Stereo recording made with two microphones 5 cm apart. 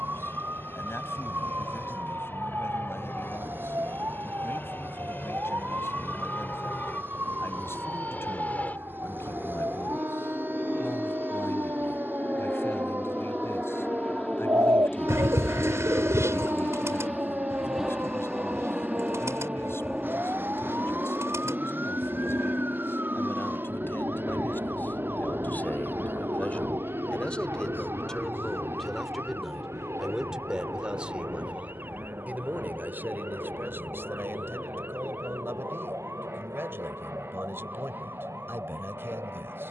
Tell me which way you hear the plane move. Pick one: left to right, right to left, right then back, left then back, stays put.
left to right.